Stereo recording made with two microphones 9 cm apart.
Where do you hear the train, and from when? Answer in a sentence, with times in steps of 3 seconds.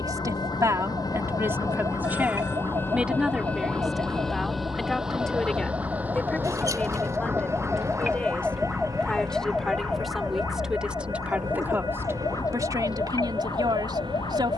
In this clip you hear the train on the left from 0 s, in the centre from 3 s and on the right from 6 s.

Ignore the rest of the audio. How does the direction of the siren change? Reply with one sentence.
In this clip you hear the siren move from right to left.